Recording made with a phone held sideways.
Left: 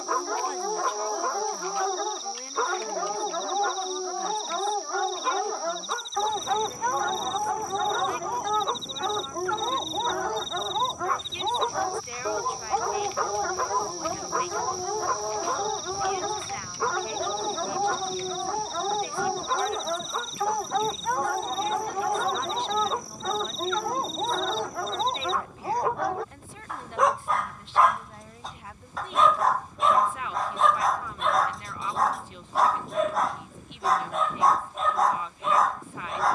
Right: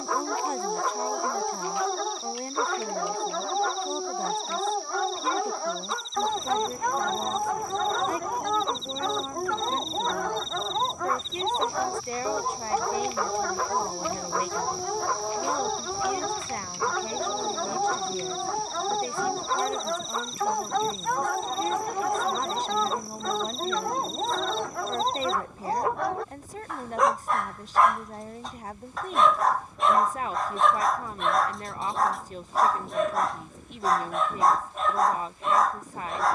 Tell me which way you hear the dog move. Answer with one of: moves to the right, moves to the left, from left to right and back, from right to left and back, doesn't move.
doesn't move.